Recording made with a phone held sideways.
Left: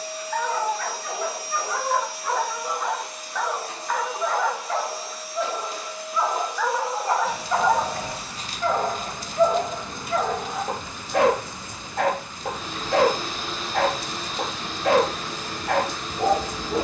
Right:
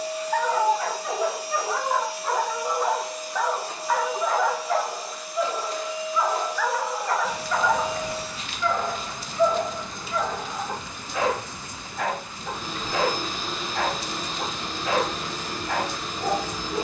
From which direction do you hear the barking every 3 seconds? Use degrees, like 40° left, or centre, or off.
20° right, centre, 30° left, 60° left, 70° left, 70° left.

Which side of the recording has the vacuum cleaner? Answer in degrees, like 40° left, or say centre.
centre.